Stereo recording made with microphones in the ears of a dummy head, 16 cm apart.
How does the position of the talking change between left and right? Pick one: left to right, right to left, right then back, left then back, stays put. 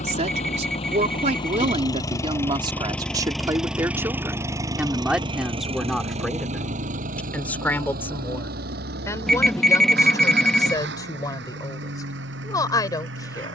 right to left.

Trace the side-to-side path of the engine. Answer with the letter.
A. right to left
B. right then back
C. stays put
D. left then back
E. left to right
E.